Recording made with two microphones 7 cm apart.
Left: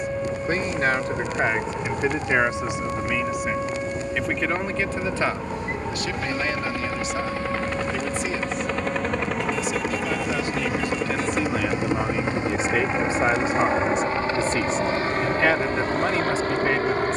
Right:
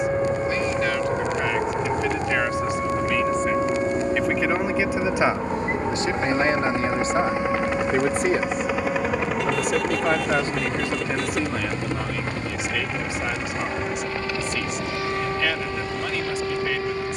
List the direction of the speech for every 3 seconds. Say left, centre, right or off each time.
left, centre, right, right, left, left.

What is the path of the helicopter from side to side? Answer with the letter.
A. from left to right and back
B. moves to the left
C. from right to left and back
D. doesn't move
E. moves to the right
B.